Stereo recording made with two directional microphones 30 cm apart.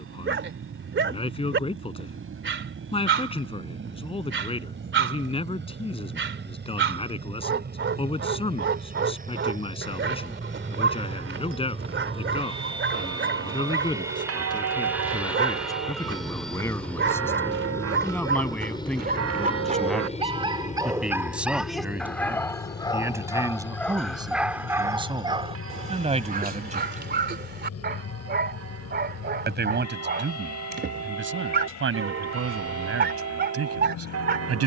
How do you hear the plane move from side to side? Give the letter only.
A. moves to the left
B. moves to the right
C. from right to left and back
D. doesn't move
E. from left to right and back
A.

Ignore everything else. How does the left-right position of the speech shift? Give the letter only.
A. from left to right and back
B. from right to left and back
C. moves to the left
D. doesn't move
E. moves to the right
E.